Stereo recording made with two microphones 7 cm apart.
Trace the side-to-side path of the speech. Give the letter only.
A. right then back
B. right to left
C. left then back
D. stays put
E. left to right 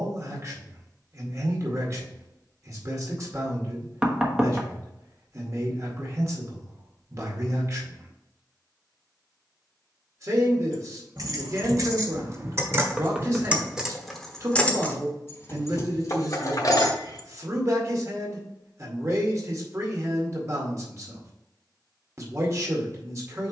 D.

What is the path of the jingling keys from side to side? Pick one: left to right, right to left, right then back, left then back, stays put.
right to left.